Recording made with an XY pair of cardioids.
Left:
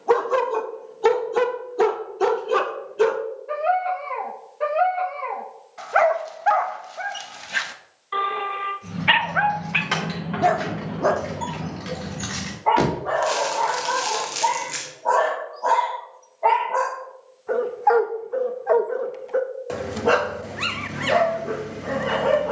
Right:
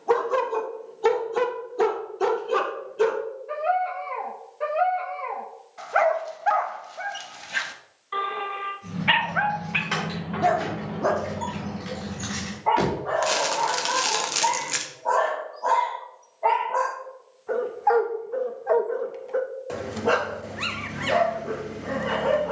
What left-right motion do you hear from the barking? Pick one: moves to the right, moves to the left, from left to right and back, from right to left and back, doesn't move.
doesn't move.